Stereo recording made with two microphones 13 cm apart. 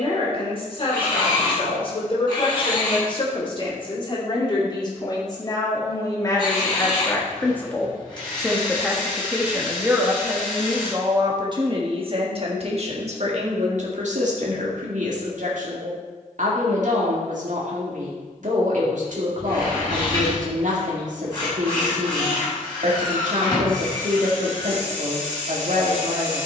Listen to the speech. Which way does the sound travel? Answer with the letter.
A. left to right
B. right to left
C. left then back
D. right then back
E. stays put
A.